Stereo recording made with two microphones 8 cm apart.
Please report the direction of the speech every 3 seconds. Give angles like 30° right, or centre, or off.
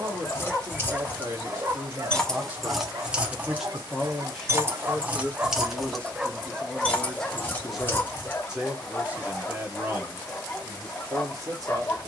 30° right, 10° left, centre, 30° right.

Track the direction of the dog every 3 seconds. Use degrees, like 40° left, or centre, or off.
20° right, 40° right, 10° left, 20° left.